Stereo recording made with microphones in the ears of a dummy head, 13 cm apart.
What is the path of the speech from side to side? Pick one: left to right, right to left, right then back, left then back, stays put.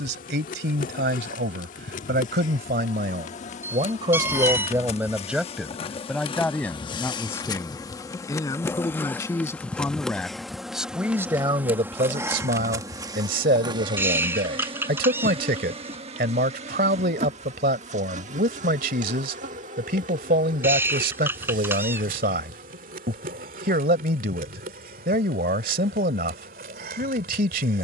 left then back.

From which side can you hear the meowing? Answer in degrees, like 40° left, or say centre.
10° right.